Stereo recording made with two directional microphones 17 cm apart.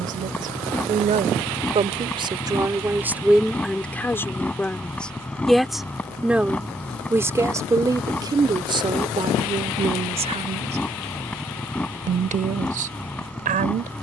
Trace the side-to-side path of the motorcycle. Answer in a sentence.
You can hear the motorcycle stay in one place.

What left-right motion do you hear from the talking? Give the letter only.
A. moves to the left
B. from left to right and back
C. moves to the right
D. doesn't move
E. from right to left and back
E.